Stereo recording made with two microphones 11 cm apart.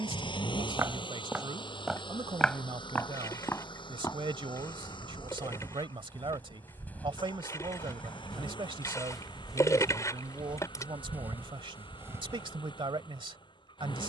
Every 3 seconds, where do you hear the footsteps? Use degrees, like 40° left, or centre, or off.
10° right, 20° left, 10° left, 10° right, 30° right.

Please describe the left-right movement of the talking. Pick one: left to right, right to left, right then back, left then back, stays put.
stays put.